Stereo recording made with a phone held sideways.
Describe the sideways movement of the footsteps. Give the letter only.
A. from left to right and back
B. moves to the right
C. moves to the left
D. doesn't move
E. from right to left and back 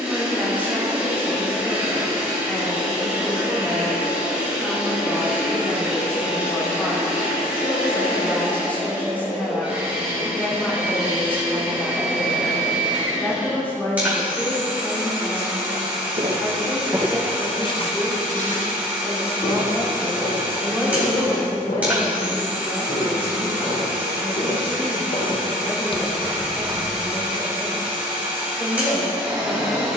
E.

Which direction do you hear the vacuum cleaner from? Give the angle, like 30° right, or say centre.
10° right.